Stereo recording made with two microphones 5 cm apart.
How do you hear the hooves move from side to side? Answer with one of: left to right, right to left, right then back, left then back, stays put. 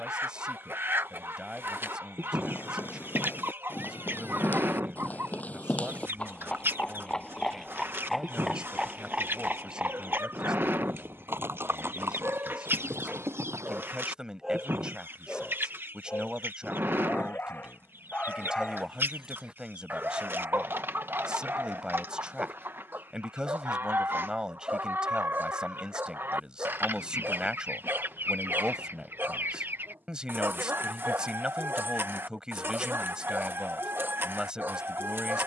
left to right.